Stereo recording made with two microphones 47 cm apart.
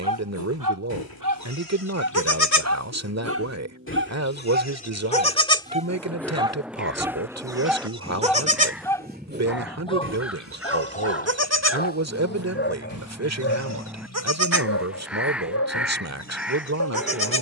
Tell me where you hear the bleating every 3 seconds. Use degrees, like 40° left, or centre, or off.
40° left, 20° left, 10° right, 30° right, 40° right, 50° right.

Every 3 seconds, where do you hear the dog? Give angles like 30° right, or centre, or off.
40° right, 20° right, centre, 10° left, 30° left, 30° left.